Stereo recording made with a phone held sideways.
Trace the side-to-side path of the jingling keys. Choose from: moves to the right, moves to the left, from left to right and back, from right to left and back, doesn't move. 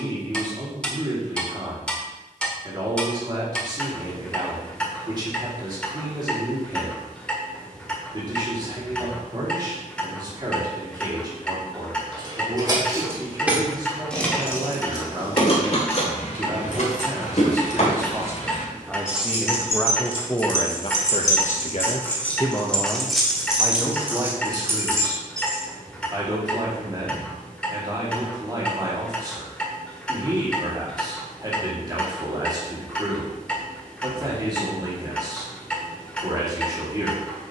from right to left and back.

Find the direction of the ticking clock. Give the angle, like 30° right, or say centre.
10° left.